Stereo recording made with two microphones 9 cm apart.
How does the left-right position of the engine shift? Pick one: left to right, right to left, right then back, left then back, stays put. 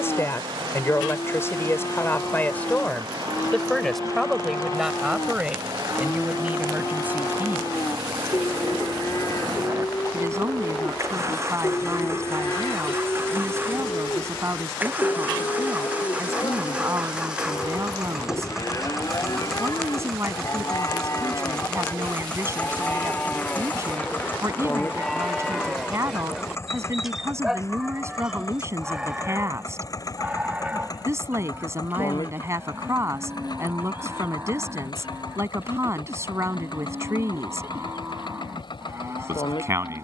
right to left.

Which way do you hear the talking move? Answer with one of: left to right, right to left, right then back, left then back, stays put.
left to right.